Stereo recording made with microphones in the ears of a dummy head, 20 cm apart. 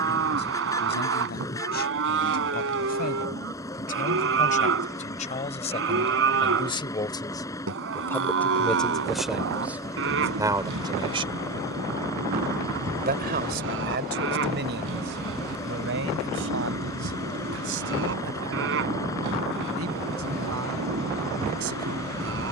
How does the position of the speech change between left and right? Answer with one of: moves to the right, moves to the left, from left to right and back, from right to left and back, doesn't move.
moves to the right.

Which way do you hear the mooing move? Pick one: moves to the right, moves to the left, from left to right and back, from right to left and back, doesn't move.
doesn't move.